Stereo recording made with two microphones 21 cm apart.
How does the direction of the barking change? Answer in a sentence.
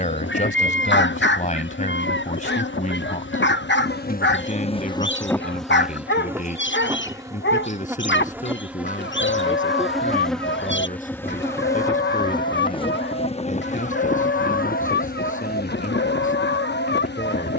You can hear the barking stay put.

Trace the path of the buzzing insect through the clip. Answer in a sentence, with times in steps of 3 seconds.
You can hear the buzzing insect on the left from 0 s, in the centre from 6 s and on the left from 12 s.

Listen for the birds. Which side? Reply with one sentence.
You can hear the birds on the left.